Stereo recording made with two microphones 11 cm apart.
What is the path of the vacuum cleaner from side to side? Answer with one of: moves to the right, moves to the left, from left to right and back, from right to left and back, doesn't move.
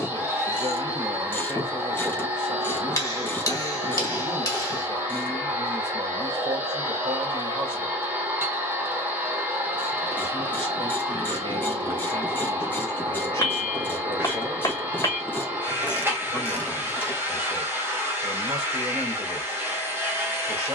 doesn't move.